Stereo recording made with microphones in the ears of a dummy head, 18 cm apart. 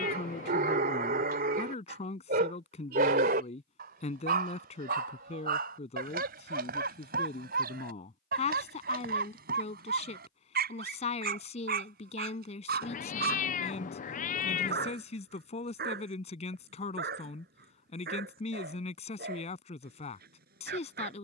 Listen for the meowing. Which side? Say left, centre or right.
left.